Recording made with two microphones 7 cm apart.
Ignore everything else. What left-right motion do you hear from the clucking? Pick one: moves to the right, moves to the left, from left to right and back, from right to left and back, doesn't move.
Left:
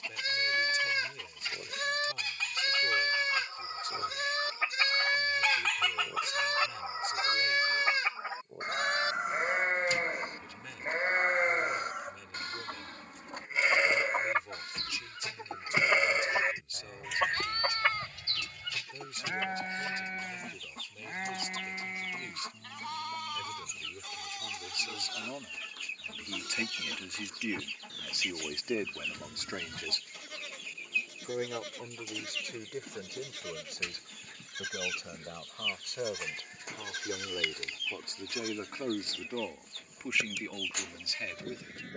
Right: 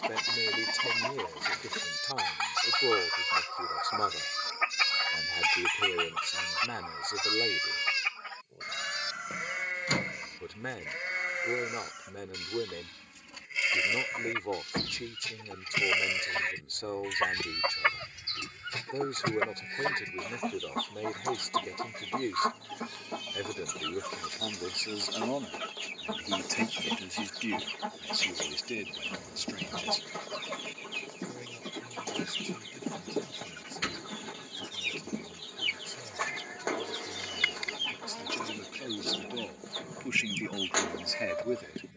from right to left and back.